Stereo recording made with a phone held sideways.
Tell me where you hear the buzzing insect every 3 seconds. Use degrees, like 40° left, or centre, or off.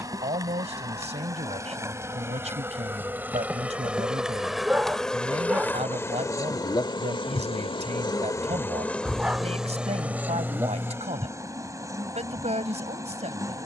20° right, centre, 30° left, 10° right, 20° right.